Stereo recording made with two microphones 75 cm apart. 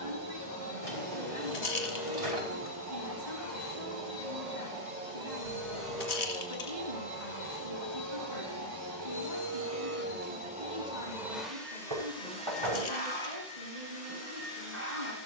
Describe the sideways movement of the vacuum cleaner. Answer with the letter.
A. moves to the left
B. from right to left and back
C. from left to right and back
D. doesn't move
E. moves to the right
C.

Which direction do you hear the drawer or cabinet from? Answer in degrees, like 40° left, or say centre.
50° right.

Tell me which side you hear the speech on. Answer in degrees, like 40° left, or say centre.
80° right.